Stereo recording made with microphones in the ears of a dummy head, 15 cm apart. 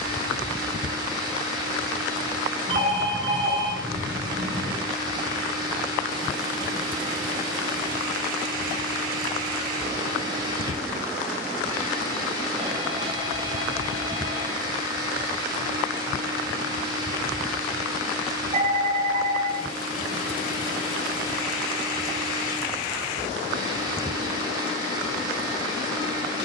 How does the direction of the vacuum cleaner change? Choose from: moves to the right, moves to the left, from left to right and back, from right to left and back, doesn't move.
doesn't move.